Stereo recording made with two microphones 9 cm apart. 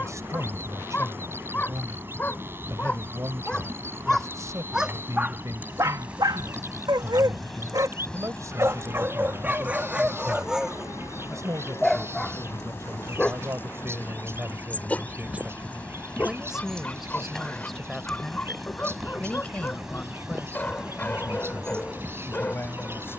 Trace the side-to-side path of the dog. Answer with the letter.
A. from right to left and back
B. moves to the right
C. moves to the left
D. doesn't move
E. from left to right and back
E.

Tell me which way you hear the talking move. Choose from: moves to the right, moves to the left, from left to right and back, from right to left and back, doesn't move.
moves to the left.